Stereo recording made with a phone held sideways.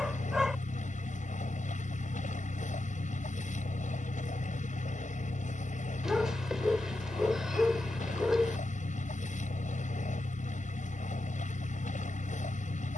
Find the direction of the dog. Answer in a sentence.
You can hear the dog in the centre.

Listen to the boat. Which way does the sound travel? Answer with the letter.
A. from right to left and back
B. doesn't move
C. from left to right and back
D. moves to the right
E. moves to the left
B.